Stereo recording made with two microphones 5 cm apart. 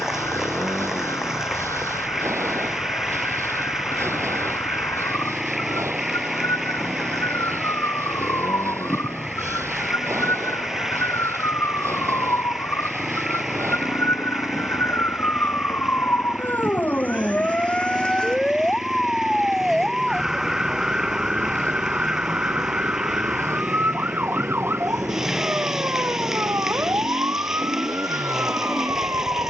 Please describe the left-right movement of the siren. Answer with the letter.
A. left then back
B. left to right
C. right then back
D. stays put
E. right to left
B.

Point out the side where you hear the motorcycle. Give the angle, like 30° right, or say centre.
70° right.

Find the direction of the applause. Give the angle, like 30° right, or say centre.
10° right.